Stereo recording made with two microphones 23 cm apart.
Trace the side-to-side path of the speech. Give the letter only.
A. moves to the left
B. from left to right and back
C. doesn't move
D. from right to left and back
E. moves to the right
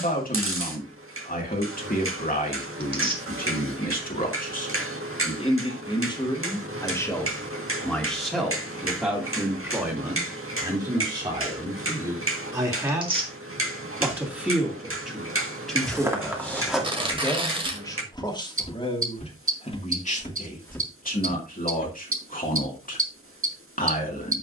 B.